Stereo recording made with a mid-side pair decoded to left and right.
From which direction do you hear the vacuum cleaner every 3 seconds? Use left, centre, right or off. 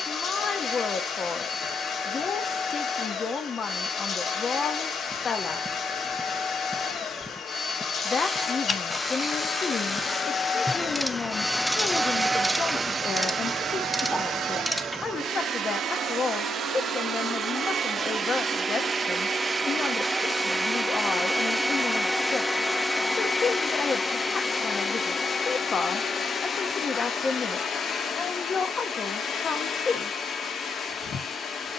left, left, left, left, right, right, right, centre, left, left, left.